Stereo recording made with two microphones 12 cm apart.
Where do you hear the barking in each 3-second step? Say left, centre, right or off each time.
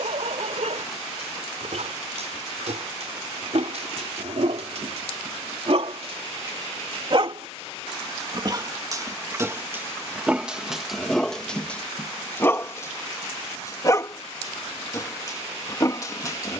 right, right, right, centre, left, left.